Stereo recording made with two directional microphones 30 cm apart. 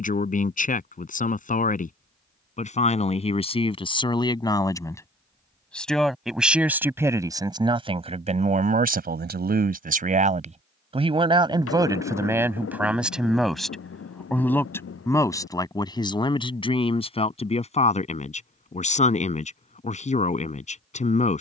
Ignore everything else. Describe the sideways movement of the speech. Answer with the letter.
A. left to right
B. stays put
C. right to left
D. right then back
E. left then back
D.